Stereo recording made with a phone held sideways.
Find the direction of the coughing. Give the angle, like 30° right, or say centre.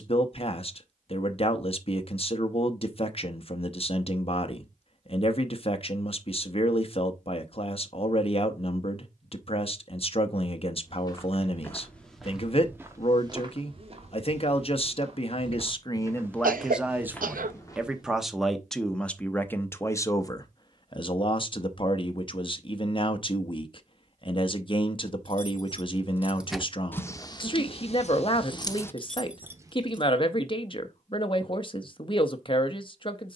80° right.